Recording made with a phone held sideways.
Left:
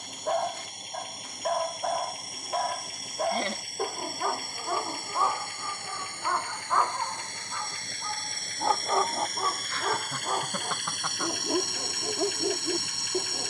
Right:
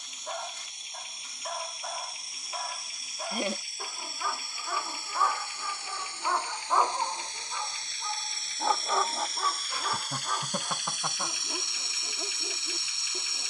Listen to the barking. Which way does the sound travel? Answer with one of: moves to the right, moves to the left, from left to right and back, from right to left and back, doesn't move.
from left to right and back.